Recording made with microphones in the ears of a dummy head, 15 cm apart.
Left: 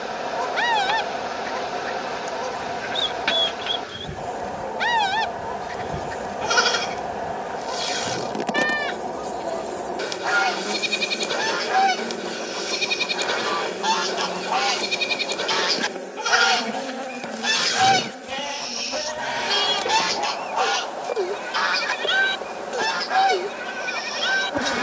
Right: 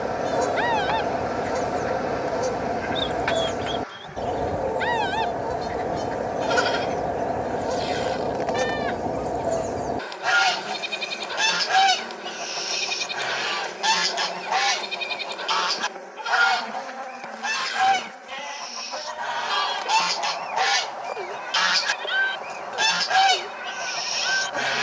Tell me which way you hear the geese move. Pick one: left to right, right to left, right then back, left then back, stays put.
left then back.